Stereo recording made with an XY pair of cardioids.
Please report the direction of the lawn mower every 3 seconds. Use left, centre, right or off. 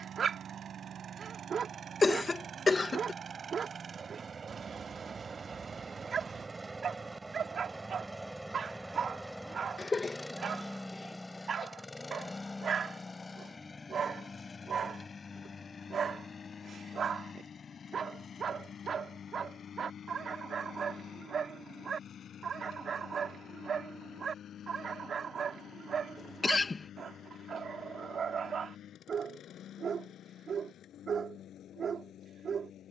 right, right, centre, centre, left, left, left, left, left, left, left.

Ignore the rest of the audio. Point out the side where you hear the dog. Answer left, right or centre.
right.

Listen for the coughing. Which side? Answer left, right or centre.
left.